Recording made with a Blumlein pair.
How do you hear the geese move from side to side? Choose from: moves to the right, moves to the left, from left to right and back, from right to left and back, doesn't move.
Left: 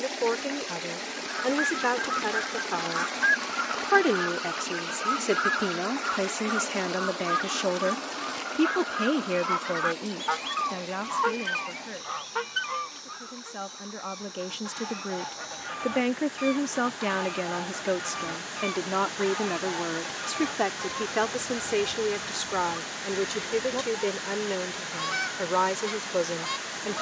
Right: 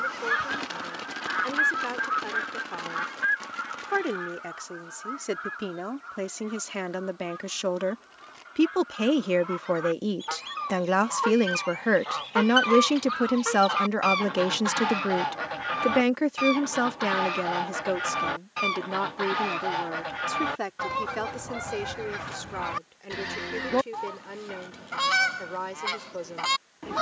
from right to left and back.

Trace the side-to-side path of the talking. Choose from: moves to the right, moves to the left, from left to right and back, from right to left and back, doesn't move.
from left to right and back.